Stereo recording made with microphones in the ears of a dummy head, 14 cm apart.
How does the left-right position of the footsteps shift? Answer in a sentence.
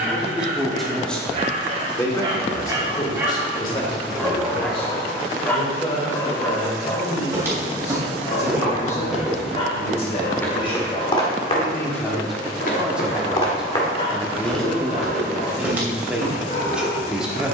In this clip you hear the footsteps go left and come back.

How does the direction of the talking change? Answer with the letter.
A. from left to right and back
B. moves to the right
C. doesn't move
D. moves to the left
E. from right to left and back
E.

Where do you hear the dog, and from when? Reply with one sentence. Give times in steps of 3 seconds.
You can hear the dog on the right from 0 s, in the centre from 3 s and on the left from 6 s.